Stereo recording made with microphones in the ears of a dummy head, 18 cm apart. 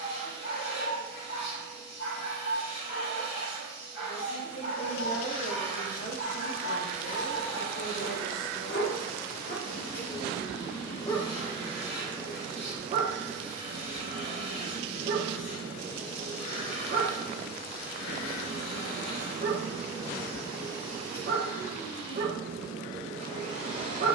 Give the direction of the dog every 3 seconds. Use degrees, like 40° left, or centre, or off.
60° left, 60° left, 50° left, 20° left, 30° right, 40° right, 40° right, 40° right.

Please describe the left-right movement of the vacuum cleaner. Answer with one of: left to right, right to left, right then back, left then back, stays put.
stays put.